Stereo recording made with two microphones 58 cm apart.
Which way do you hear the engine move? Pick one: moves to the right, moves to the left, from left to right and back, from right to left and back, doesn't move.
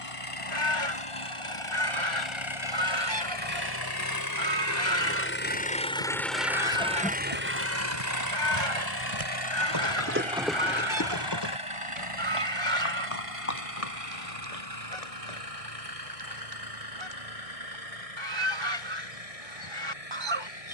moves to the right.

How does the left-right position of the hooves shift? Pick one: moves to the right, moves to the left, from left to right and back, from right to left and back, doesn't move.
moves to the left.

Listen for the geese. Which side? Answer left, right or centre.
right.